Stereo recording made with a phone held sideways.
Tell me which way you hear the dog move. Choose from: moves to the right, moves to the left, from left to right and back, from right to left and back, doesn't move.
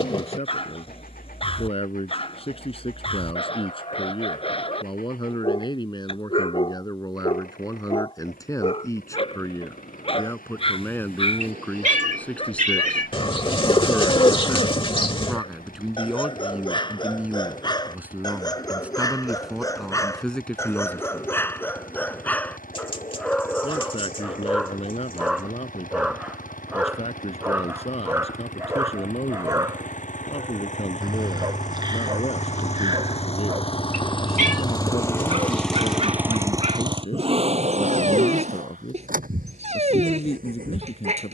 moves to the right.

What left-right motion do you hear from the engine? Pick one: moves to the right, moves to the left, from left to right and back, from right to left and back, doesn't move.
moves to the right.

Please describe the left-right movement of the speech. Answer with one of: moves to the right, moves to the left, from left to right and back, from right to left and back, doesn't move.
from left to right and back.